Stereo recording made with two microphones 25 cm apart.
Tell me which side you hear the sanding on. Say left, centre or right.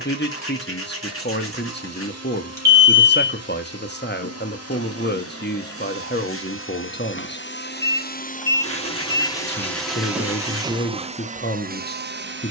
left.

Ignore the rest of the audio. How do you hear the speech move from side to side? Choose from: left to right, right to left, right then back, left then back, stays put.
stays put.